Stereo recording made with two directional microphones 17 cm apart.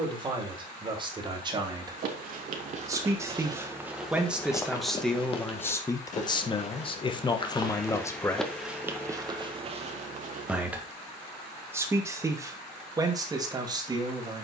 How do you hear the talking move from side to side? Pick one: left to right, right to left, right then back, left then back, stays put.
left then back.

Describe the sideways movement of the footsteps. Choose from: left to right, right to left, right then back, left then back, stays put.
left then back.